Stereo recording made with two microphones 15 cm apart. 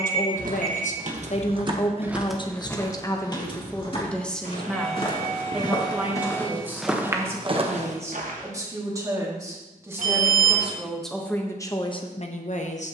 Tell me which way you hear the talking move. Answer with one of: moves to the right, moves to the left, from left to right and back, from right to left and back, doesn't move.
from left to right and back.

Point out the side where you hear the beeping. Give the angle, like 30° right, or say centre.
70° right.